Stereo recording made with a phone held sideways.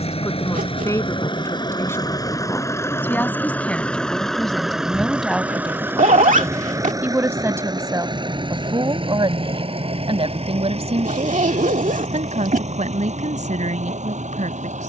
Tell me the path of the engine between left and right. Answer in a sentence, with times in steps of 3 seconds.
In this clip you hear the engine on the left from 0 s, in the centre from 3 s and on the right from 6 s.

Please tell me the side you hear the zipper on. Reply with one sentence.
You can hear the zipper on the right.